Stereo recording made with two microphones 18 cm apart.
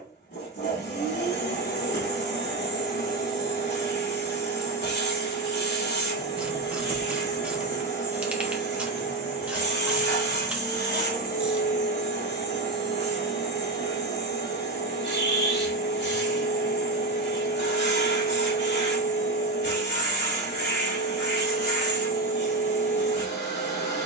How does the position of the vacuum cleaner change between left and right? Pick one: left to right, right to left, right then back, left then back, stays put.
stays put.